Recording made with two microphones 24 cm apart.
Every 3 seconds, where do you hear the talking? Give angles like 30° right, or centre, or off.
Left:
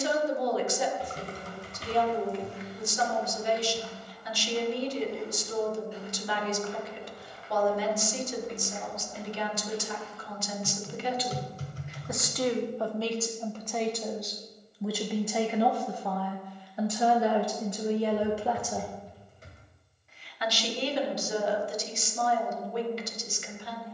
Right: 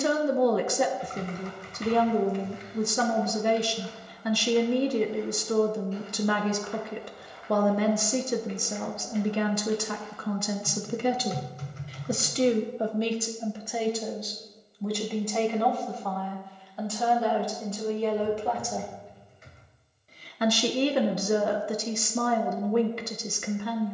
60° right, 60° right, 60° right, 50° right, 10° right, 10° left, 20° right, 60° right.